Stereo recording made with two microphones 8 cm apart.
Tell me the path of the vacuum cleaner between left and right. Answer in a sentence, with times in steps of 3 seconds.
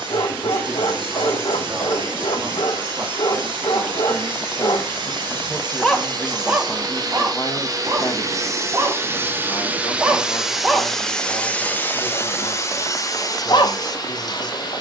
In this clip you hear the vacuum cleaner on the right from 0 s, in the centre from 9 s and on the left from 12 s.